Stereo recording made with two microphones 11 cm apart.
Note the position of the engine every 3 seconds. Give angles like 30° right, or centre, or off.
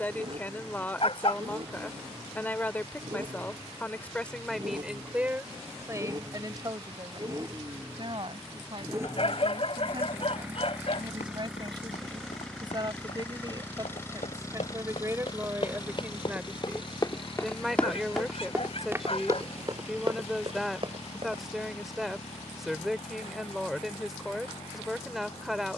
50° right, 40° right, 30° right, 10° right, 20° left, 40° left, 60° left, 70° left, 80° left.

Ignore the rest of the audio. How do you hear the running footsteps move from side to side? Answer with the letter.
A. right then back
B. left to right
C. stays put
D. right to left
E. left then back
B.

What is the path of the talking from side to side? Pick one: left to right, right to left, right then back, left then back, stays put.
right then back.